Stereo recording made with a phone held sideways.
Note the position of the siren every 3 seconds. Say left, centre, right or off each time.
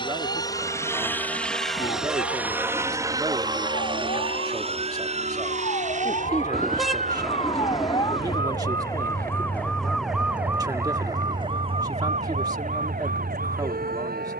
left, left, left, centre, right.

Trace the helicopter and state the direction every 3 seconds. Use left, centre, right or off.
centre, right, right, right, right.